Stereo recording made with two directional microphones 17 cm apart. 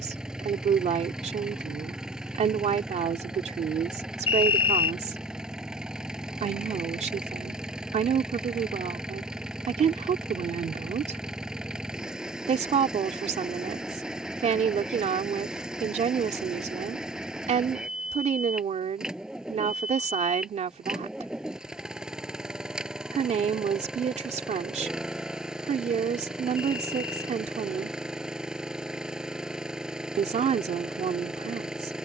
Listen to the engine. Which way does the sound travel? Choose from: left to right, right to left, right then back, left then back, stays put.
stays put.